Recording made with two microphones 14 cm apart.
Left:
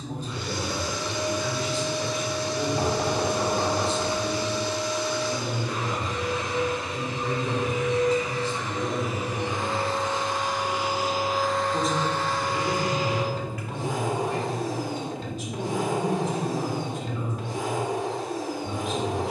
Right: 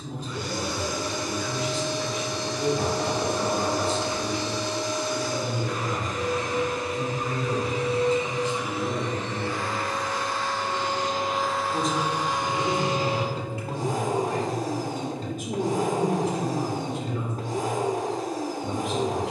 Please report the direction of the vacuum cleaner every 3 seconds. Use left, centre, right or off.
right, right, right, centre, right, right, right.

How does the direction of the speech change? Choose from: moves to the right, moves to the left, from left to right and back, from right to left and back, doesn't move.
moves to the right.